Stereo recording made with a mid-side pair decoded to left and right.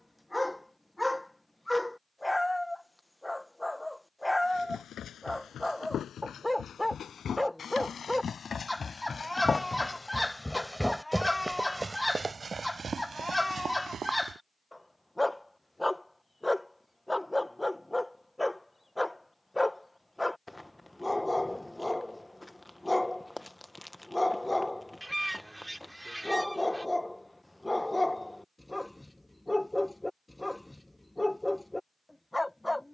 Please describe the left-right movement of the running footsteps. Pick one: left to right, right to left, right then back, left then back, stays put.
left to right.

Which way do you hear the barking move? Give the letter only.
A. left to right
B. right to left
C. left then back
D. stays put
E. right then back
D.